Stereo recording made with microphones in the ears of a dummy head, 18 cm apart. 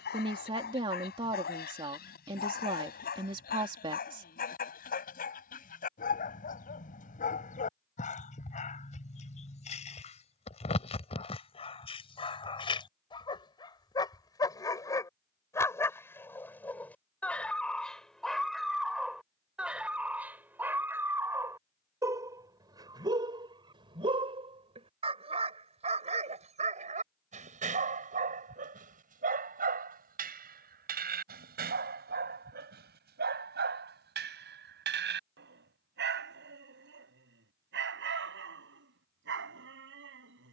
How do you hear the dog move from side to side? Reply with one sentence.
You can hear the dog move from left to right.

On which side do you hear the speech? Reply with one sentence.
In this clip you hear the speech on the right.